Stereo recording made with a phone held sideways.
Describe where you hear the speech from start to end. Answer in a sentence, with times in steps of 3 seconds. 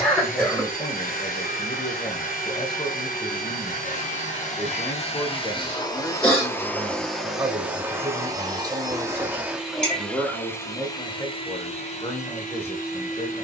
In this clip you hear the speech on the left from 0 s, in the centre from 6 s and on the left from 12 s.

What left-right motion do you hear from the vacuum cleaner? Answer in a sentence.
You can hear the vacuum cleaner go right and come back.